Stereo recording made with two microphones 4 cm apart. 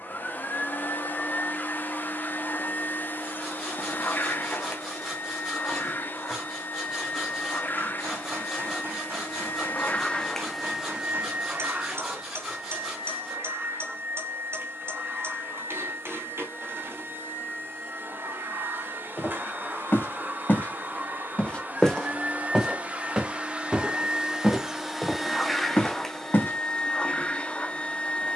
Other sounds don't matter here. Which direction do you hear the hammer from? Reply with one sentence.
You can hear the hammer on the right.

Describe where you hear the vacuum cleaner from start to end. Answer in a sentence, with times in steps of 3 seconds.
In this clip you hear the vacuum cleaner on the left from 0 s, in the centre from 9 s, on the right from 12 s, in the centre from 24 s and on the left from 27 s.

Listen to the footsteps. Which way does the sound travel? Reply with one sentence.
You can hear the footsteps move from left to right and back again.